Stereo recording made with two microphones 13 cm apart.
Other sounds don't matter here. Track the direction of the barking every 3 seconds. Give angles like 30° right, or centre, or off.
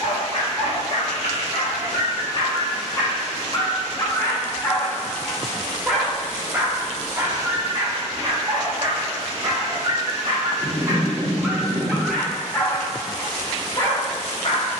50° left, 20° left, 30° right, 30° right, 30° left.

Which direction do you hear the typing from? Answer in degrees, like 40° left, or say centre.
60° left.